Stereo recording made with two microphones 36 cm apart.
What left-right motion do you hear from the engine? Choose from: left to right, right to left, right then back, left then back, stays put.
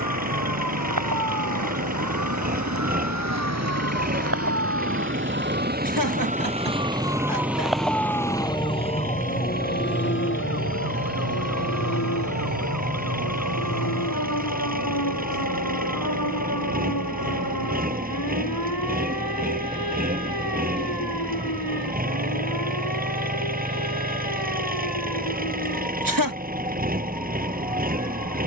stays put.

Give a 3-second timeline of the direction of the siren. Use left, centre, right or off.
right, right, centre, left, left, left, left, left, left, left.